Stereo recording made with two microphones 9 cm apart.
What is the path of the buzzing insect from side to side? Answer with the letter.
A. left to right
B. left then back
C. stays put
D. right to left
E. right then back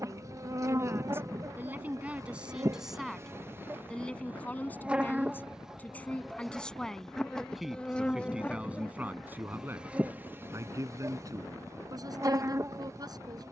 B.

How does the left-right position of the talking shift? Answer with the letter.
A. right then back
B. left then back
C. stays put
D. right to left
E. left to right
B.